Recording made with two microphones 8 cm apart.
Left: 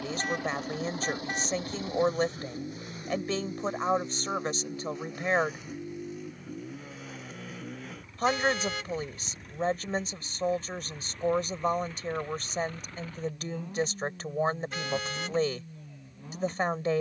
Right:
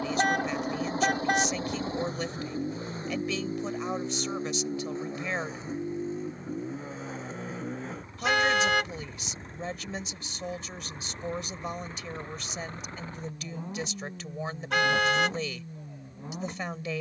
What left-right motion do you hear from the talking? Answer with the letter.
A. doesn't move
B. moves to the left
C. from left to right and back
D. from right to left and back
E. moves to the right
A.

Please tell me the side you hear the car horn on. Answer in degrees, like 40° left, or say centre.
70° right.